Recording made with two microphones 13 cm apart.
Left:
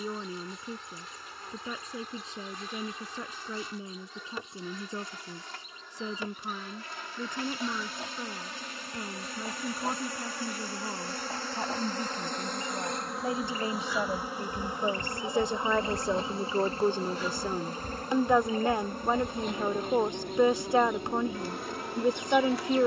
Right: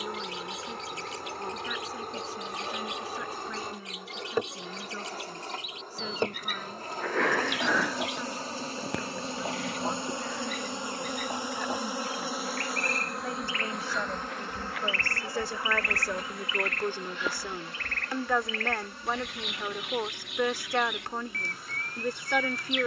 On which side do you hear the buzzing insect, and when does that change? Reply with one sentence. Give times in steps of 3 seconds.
You can hear the buzzing insect on the right from 0 s, in the centre from 12 s and on the left from 15 s.